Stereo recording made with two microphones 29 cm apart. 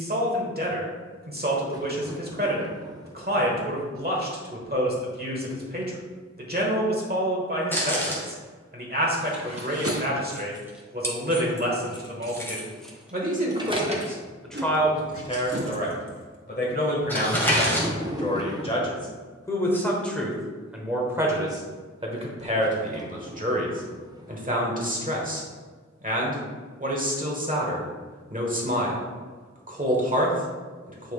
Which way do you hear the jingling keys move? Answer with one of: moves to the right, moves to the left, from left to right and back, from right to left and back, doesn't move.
from right to left and back.